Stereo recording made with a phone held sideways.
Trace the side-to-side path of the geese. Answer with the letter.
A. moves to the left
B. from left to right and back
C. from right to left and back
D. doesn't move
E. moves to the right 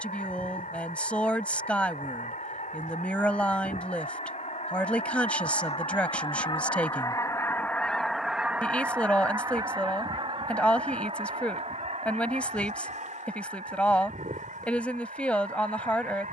E.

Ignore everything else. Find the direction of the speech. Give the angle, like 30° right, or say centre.
10° left.